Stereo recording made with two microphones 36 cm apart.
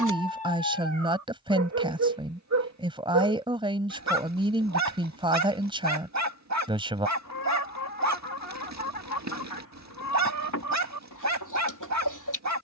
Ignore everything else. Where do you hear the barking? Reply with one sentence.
In this clip you hear the barking on the right.